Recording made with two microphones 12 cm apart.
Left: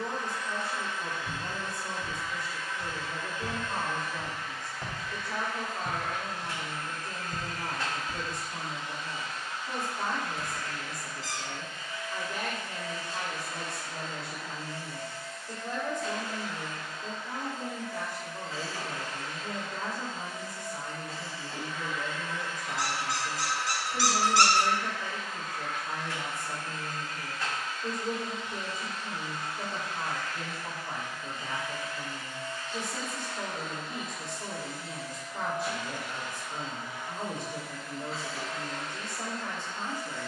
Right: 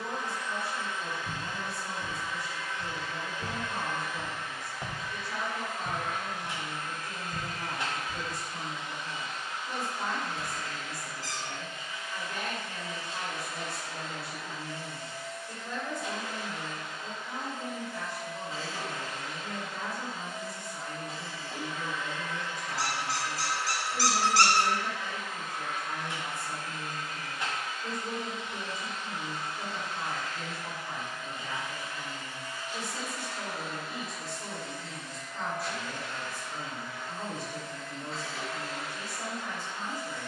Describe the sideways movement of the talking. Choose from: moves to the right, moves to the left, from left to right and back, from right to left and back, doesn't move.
doesn't move.